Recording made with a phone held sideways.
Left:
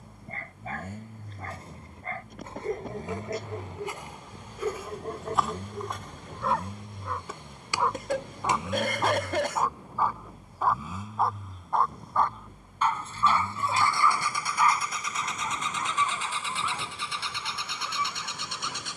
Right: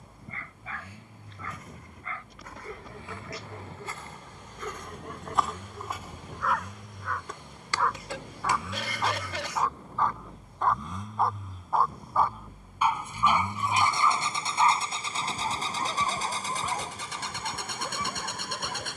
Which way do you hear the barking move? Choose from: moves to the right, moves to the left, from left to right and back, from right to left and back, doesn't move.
moves to the right.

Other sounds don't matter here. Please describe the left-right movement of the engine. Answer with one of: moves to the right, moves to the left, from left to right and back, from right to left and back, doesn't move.
moves to the right.